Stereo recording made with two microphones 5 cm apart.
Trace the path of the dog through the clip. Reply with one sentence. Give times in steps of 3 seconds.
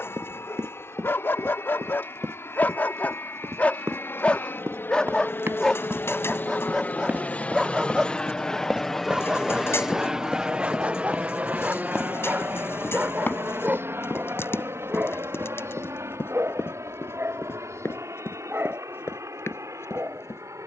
In this clip you hear the dog on the left from 0 s, in the centre from 6 s and on the right from 9 s.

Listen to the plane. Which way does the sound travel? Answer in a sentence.
In this clip you hear the plane travel towards the right.